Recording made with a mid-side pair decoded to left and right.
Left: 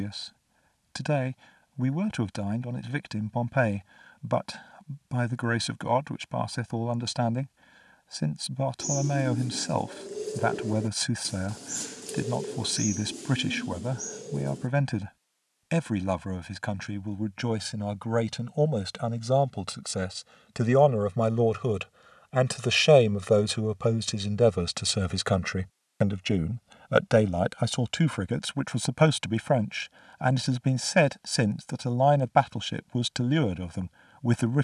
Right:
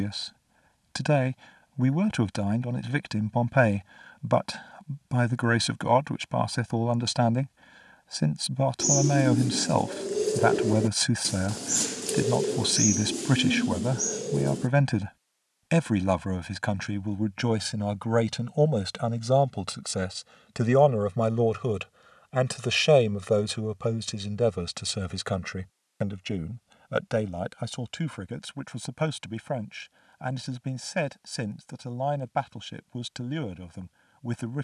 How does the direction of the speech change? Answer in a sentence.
In this clip you hear the speech travel towards the left.